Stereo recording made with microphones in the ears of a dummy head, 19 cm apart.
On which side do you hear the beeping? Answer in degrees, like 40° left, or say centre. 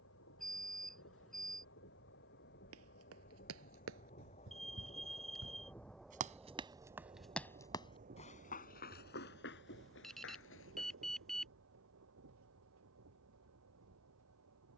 centre.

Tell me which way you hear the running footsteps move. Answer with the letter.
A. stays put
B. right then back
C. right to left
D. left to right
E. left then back
C.